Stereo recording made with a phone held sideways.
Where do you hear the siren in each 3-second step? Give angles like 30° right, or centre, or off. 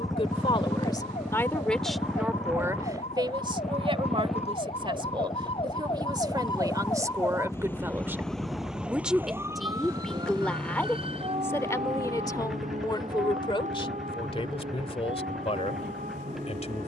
60° left, 50° left, 20° left, 30° right, 60° right, 70° right.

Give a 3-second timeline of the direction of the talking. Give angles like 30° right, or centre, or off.
10° left, 40° right, 20° right, 10° left, 40° left, 50° left.